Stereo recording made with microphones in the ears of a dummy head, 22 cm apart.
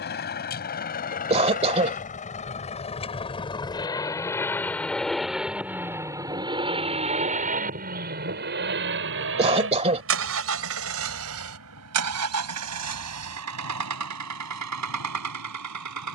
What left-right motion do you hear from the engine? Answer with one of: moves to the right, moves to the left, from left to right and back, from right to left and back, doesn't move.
moves to the right.